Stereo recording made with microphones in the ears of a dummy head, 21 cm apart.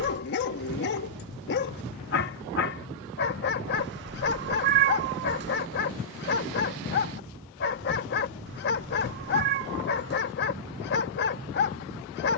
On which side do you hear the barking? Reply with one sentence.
You can hear the barking on the left.